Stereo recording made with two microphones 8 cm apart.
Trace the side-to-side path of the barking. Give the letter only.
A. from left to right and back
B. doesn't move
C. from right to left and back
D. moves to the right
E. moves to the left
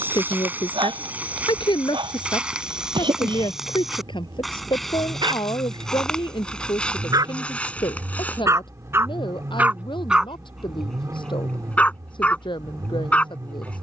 E.